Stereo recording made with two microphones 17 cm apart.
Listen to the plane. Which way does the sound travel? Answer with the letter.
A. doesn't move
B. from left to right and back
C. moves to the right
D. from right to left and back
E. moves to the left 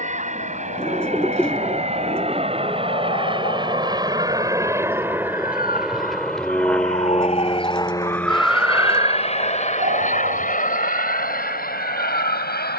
E.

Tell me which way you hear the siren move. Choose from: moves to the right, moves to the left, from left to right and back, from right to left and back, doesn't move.
moves to the right.